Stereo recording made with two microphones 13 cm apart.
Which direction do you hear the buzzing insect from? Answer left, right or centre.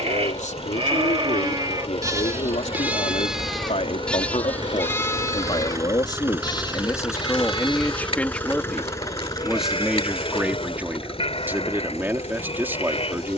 left.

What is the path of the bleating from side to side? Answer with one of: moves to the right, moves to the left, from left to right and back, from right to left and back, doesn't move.
moves to the left.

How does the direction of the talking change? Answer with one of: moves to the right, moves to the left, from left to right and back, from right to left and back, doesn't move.
moves to the right.